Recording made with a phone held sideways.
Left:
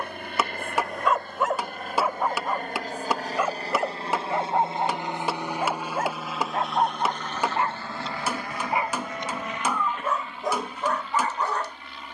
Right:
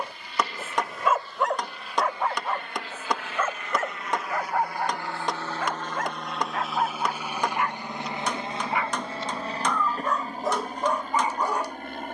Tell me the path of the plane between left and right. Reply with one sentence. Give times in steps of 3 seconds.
You can hear the plane on the left from 0 s, in the centre from 6 s and on the right from 9 s.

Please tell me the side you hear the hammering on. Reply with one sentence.
In this clip you hear the hammering in the centre.